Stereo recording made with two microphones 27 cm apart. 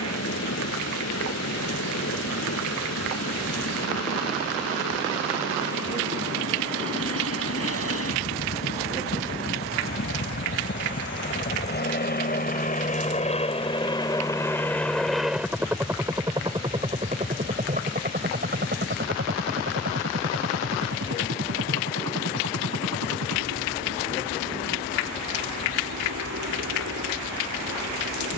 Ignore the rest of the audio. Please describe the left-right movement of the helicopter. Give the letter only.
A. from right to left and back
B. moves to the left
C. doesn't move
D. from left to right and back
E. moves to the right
E.